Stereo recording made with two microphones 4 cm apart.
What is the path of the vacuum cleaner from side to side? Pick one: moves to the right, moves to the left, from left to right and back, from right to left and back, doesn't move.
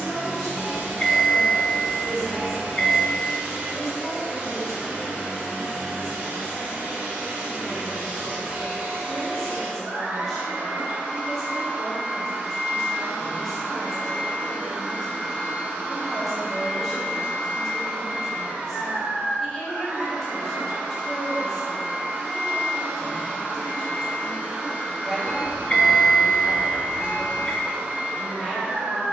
doesn't move.